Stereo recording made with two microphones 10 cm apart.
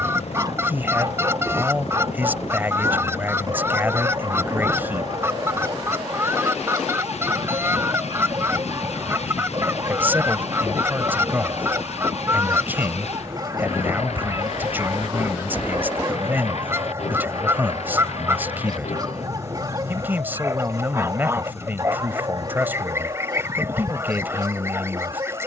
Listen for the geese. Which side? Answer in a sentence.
You can hear the geese on the right.